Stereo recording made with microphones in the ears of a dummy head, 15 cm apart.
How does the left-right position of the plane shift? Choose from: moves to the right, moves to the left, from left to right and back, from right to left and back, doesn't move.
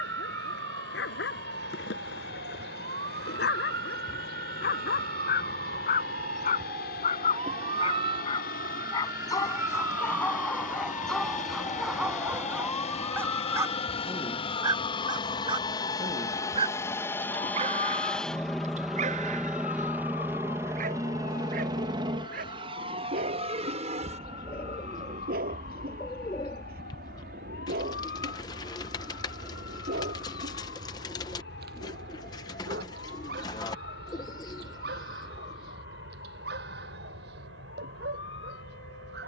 moves to the right.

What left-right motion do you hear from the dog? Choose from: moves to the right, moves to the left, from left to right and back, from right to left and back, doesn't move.
moves to the right.